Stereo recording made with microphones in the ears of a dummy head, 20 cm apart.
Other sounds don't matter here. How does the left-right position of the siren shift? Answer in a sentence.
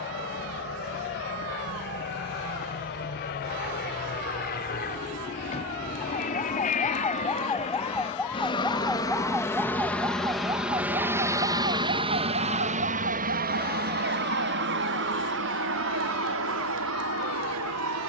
In this clip you hear the siren move to the right.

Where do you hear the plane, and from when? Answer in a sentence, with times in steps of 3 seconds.
You can hear the plane on the left from 0 s, in the centre from 9 s and on the right from 12 s.